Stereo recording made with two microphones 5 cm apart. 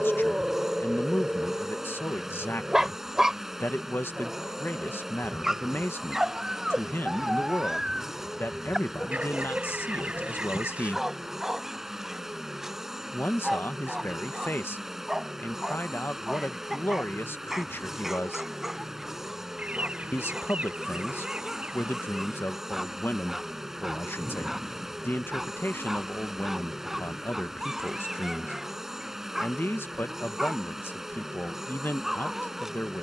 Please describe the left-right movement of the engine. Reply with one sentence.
In this clip you hear the engine stay in one place.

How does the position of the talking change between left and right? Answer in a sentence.
You can hear the talking stay in one place.